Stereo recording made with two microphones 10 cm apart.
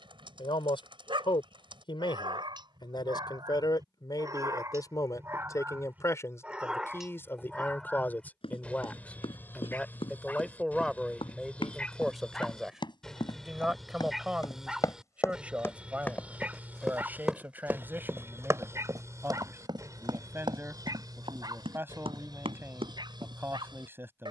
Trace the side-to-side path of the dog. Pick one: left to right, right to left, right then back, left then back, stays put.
left then back.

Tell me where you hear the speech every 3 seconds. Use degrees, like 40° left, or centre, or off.
60° left, 40° left, 20° left, 10° left, 10° right, 10° right, 20° right, 20° right.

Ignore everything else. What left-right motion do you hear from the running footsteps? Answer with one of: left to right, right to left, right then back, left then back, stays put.
left to right.